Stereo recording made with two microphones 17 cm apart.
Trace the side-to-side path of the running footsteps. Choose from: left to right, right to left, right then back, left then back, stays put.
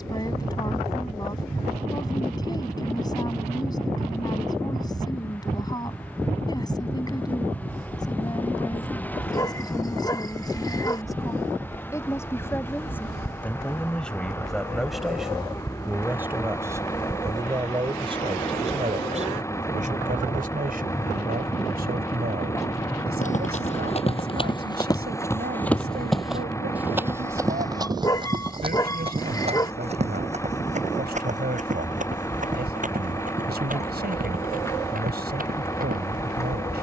left to right.